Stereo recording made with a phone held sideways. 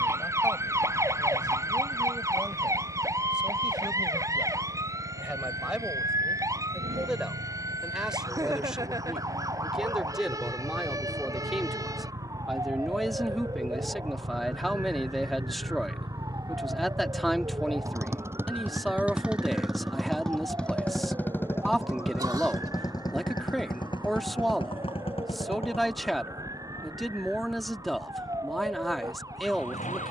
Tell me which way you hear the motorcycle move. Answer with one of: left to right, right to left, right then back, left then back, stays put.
right to left.